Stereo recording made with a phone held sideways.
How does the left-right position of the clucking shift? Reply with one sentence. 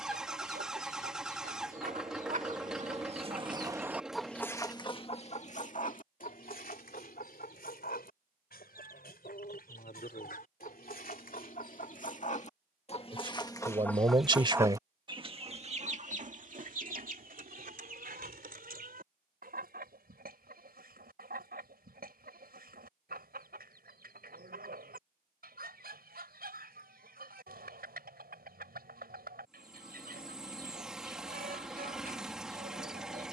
In this clip you hear the clucking move from right to left and back again.